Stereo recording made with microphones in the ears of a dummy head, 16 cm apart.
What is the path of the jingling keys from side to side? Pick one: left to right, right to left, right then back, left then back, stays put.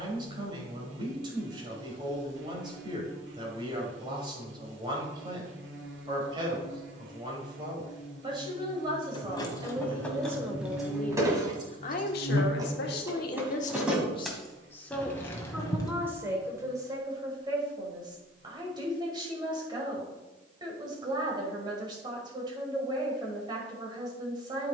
right then back.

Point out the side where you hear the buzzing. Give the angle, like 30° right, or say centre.
70° right.